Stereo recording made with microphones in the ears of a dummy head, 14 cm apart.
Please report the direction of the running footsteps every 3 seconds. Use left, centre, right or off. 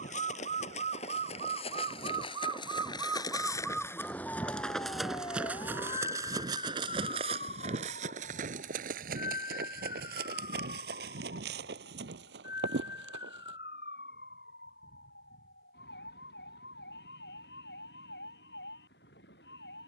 left, centre, right, right, right, off, off.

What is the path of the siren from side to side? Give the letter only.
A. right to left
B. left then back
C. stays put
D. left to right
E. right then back
A.